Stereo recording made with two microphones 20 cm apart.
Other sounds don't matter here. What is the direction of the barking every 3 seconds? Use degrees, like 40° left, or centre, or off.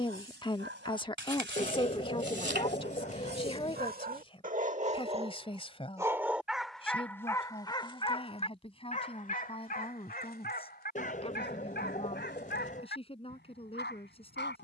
70° right, 40° right, 10° left, 50° left, 60° left.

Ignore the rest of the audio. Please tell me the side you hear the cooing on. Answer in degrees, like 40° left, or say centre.
40° left.